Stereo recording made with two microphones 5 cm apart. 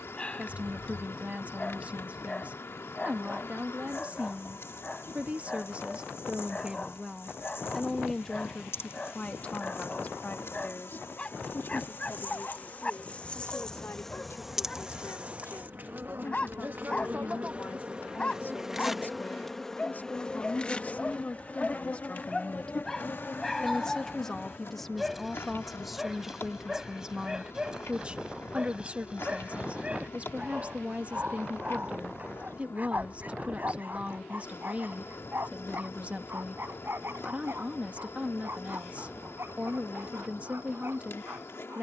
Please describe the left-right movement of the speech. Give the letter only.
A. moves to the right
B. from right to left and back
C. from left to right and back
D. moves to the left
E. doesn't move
B.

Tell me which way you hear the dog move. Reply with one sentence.
You can hear the dog travel towards the right.